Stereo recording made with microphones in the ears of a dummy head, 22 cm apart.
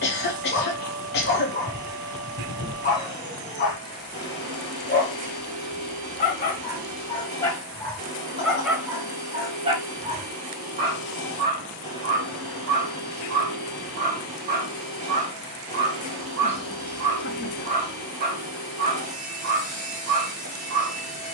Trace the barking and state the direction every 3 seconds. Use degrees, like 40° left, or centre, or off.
30° left, 30° left, 10° left, 30° right, 40° right, 40° right, 40° right.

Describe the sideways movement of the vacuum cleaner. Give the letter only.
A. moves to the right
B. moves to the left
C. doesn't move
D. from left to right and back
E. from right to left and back
C.